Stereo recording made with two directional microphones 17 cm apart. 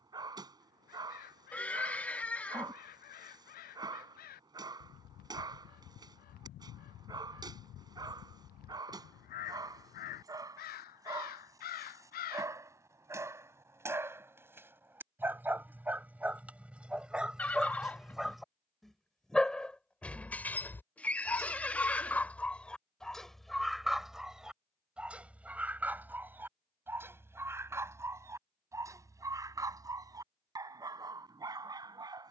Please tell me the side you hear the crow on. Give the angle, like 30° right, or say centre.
60° left.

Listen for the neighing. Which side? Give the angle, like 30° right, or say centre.
10° left.